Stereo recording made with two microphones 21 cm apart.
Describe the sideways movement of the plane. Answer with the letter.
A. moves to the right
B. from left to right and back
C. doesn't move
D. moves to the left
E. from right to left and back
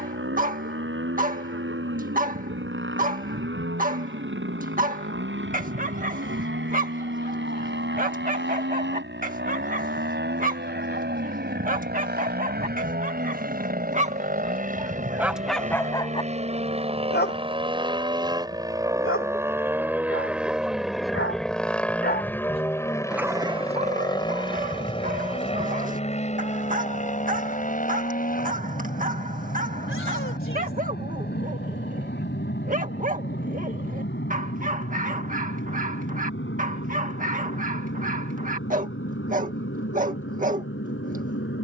D.